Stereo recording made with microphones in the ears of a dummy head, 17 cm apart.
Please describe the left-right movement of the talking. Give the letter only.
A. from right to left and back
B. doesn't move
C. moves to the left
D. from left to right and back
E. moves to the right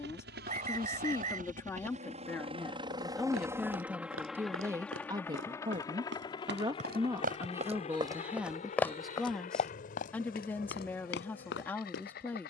D.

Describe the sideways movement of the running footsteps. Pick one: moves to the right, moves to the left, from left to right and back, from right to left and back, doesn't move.
moves to the left.